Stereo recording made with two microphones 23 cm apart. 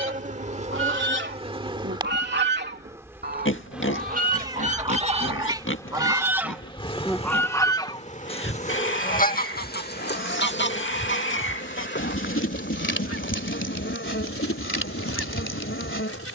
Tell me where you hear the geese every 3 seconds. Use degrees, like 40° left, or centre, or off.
50° right, 30° right, 10° left, 50° left, 70° left, 80° left.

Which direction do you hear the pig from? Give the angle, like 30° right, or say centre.
60° left.